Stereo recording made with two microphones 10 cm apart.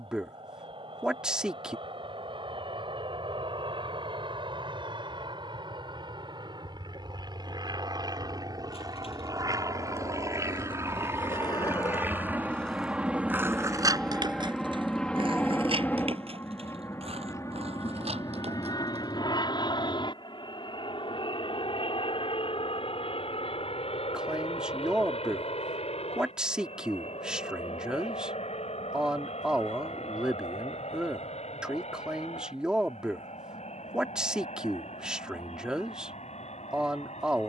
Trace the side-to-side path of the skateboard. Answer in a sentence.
You can hear the skateboard go from the left side to the right.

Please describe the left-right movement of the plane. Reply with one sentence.
In this clip you hear the plane move from right to left.